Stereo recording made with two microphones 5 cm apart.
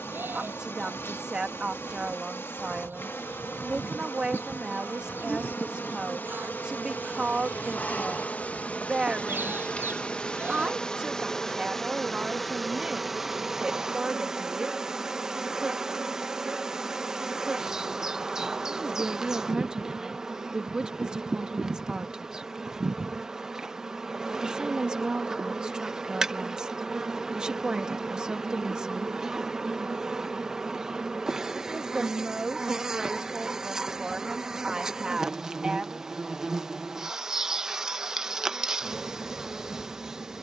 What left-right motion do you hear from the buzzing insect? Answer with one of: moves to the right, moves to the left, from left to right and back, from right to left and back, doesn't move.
moves to the right.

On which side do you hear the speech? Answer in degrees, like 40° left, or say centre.
20° right.